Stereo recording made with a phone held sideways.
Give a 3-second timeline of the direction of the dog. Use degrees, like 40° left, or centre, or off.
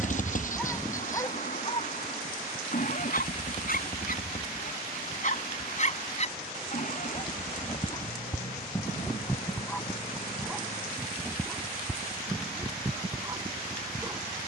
30° left, 60° left, 30° left, centre, 20° right.